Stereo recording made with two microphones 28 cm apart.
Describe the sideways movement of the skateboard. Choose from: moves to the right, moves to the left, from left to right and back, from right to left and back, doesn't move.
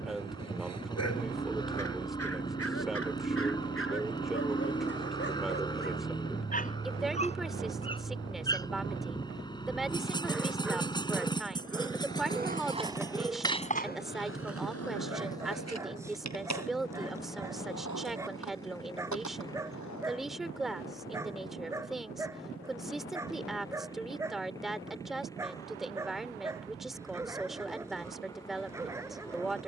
moves to the left.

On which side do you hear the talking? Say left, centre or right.
centre.